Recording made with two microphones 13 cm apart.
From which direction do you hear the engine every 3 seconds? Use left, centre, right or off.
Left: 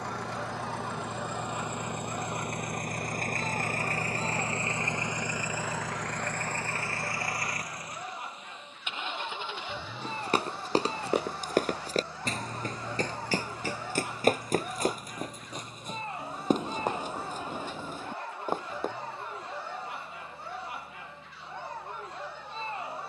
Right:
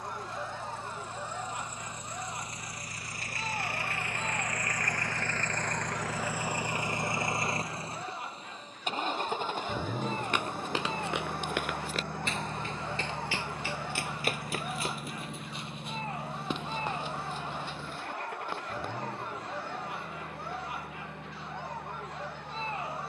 left, left, right, right, right, right, right, right.